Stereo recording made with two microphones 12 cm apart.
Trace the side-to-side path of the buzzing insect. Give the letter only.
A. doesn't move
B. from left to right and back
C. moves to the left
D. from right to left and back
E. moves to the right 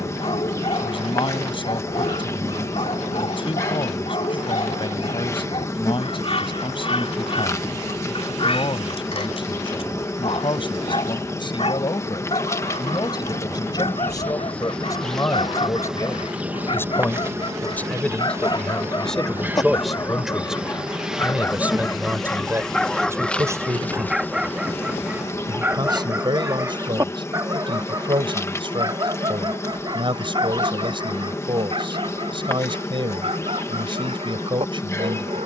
B.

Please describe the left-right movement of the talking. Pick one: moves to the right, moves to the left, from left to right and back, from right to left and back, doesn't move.
moves to the right.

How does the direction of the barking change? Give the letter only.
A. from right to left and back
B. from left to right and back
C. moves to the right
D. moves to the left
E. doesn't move
C.